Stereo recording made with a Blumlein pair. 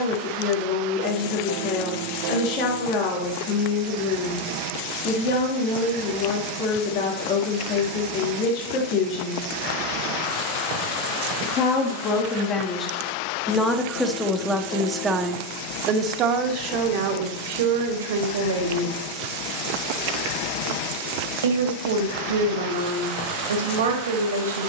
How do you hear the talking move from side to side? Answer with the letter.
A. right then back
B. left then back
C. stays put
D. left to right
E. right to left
D.